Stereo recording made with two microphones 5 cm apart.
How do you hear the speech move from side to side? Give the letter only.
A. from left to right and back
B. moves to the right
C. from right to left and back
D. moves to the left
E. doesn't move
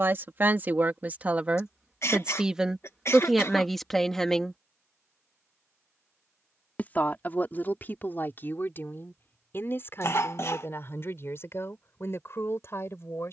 D.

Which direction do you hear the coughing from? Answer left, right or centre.
left.